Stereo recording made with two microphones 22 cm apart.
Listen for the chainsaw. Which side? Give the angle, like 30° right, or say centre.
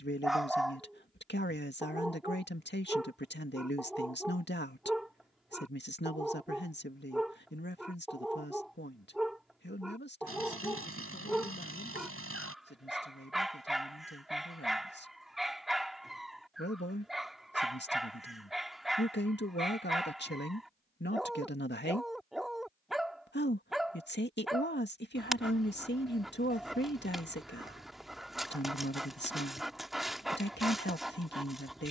80° right.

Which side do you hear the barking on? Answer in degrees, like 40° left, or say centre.
centre.